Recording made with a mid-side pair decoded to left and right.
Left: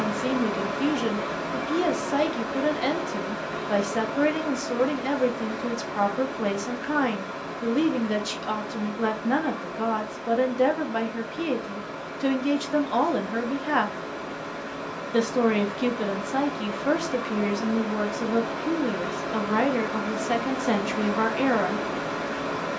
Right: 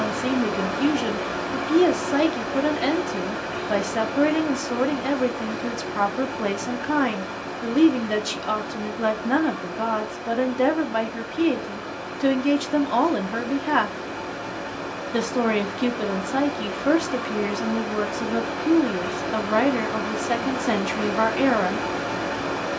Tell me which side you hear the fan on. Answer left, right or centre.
right.